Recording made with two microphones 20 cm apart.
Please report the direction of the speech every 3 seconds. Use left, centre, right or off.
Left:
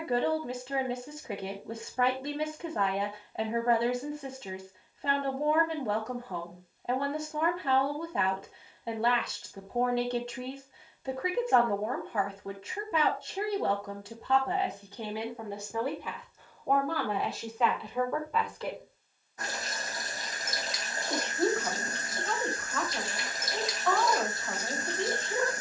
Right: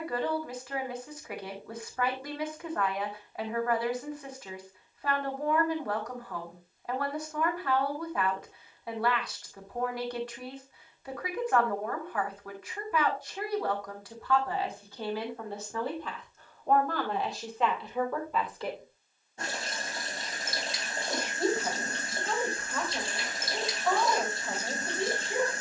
left, left, left, left, left, centre, centre, centre, centre.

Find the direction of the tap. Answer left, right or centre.
right.